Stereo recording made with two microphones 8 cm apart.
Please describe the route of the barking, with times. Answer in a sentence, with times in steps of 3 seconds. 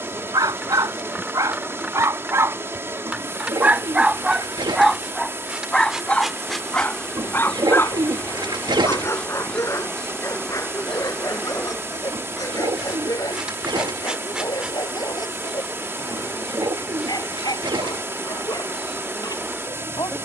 In this clip you hear the barking on the right from 0 s, in the centre from 3 s and on the left from 6 s.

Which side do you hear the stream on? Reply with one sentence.
You can hear the stream on the right.